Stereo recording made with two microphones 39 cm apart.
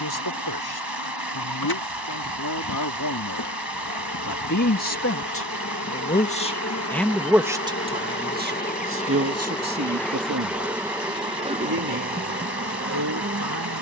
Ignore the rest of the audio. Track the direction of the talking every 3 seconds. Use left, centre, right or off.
left, left, centre, right, right.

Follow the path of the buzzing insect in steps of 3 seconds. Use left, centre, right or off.
left, left, left, centre, right.